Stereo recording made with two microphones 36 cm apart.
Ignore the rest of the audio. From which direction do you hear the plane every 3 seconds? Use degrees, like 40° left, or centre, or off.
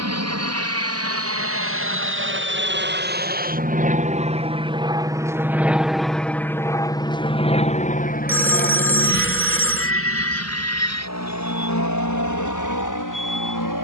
40° right, 20° right, 20° left, 40° left, 50° left.